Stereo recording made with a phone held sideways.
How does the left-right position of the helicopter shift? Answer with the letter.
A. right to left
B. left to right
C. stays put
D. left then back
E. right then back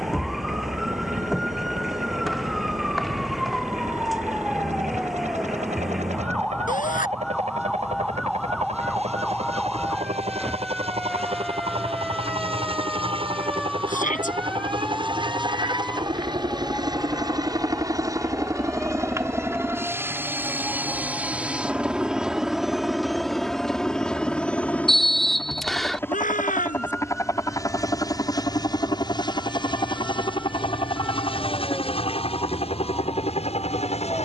A.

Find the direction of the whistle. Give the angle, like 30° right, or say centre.
centre.